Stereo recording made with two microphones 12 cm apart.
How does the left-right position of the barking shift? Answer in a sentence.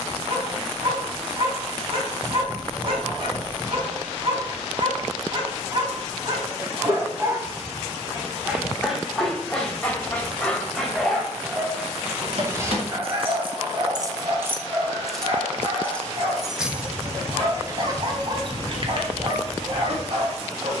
In this clip you hear the barking go left and come back.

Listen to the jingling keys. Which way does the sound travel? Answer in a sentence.
You can hear the jingling keys move from right to left and back again.